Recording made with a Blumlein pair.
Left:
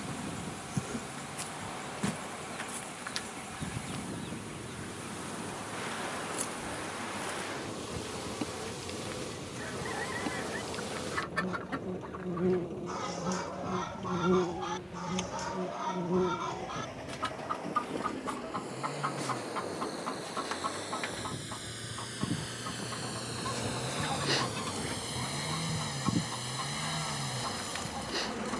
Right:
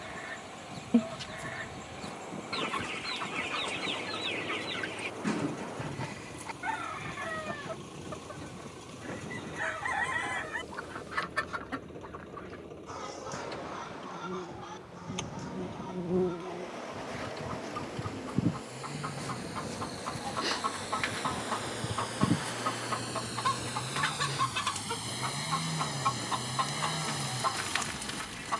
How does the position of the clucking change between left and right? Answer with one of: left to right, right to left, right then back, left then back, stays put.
left then back.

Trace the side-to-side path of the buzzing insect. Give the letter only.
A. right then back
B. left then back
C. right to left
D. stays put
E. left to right
A.